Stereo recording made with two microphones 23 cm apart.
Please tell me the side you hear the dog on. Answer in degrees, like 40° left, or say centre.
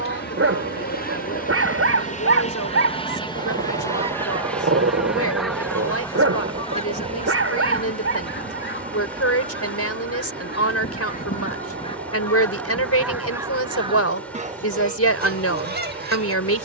70° right.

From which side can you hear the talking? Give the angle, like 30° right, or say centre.
80° left.